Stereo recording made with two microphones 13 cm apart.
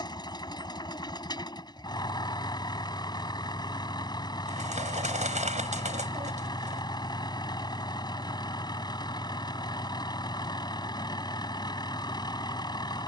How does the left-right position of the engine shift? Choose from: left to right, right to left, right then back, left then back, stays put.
stays put.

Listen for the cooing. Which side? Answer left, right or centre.
right.